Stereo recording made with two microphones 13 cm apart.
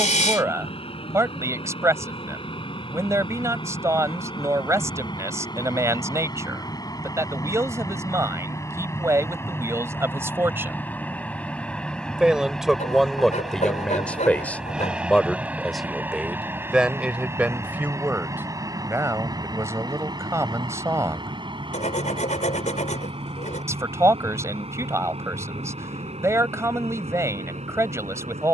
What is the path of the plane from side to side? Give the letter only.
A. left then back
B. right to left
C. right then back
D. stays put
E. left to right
E.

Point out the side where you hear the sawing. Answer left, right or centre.
left.